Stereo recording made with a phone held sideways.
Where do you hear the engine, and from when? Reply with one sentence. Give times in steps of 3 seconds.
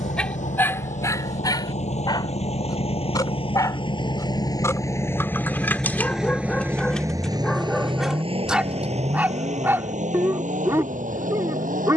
In this clip you hear the engine on the left from 0 s and on the right from 6 s.